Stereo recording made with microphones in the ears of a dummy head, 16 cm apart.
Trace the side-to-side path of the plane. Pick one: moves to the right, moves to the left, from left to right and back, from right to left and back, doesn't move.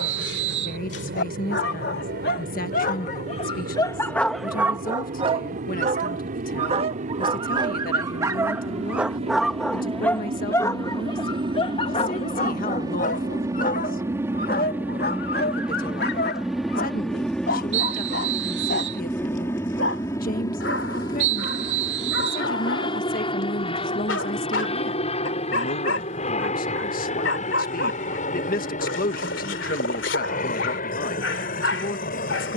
moves to the left.